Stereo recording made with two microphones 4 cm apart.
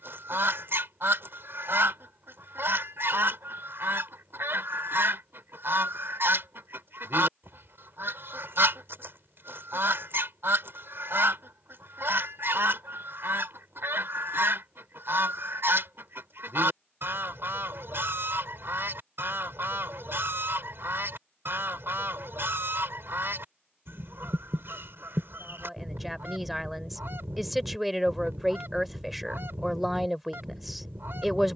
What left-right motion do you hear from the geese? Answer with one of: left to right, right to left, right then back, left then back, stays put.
stays put.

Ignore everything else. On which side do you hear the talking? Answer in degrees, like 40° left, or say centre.
centre.